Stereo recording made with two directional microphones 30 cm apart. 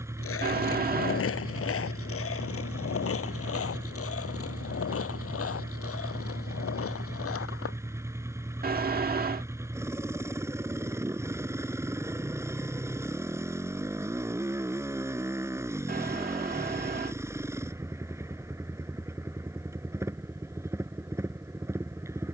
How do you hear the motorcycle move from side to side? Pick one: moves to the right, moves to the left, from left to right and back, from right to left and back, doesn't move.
doesn't move.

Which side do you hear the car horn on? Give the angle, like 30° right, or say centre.
30° right.